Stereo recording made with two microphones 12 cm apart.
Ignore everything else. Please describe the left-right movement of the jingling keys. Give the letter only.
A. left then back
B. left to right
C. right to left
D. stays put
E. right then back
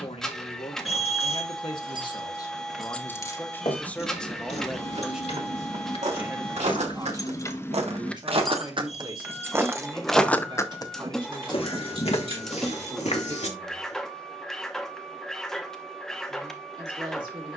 A.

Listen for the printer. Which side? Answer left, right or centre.
centre.